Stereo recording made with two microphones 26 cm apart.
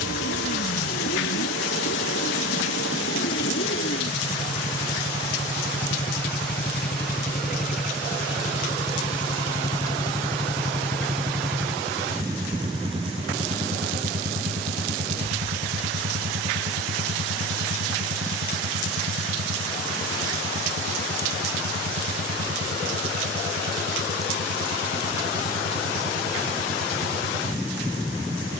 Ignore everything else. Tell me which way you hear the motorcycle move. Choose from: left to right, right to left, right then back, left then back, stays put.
left to right.